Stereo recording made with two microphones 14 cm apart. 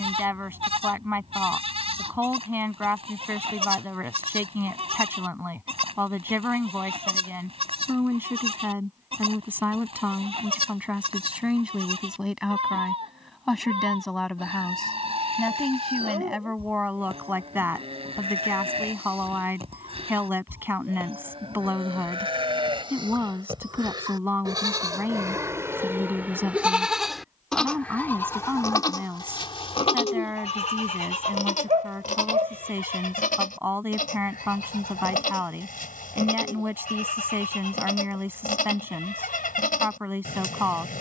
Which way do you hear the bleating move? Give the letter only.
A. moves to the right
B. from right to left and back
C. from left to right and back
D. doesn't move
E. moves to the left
E.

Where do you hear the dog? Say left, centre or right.
right.